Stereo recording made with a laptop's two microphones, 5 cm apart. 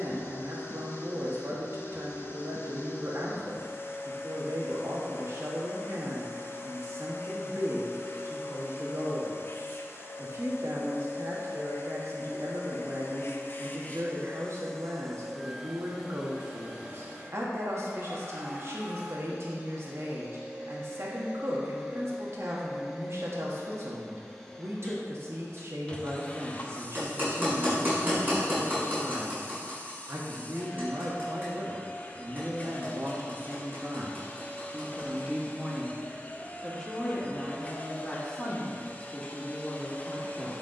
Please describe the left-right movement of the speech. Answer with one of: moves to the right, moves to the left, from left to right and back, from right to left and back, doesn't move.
moves to the left.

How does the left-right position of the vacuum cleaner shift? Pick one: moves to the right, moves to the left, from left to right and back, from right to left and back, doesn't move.
from left to right and back.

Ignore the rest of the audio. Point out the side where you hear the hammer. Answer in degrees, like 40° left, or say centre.
30° right.